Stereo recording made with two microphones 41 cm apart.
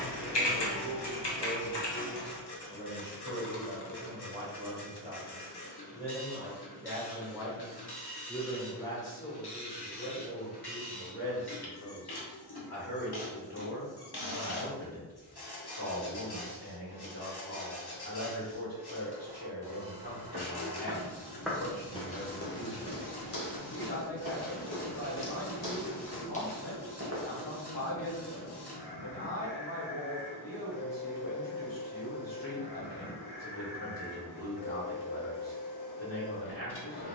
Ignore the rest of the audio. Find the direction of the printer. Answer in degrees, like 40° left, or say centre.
60° left.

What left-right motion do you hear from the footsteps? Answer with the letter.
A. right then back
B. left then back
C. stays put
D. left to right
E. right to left
B.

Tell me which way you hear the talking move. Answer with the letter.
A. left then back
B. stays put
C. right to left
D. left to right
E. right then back
C.